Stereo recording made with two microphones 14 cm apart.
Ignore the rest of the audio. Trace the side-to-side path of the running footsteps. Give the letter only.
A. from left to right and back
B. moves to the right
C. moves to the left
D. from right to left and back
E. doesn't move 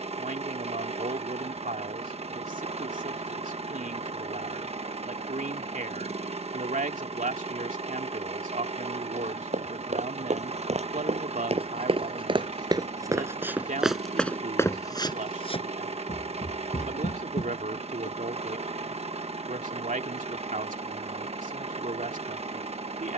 C.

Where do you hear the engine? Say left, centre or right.
right.